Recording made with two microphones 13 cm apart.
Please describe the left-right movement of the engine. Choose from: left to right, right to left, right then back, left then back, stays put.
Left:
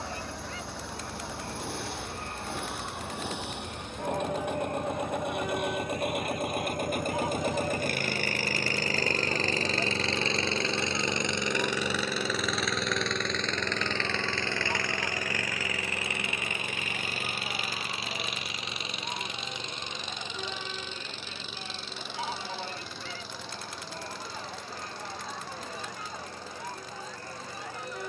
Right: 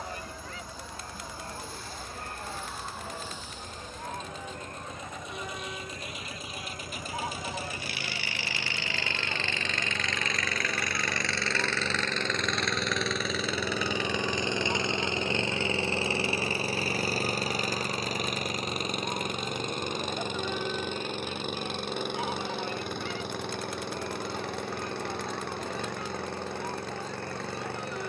left to right.